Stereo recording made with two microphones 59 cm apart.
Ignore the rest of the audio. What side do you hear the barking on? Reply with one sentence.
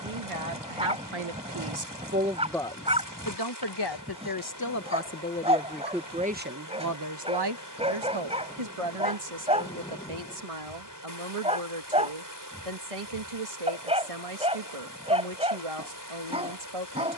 In this clip you hear the barking in the centre.